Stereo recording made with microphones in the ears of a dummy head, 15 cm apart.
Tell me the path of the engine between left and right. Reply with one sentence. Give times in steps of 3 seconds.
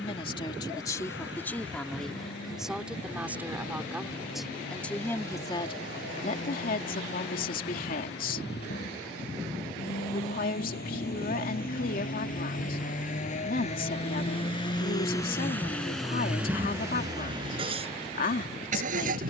You can hear the engine on the left from 0 s, in the centre from 15 s and on the right from 18 s.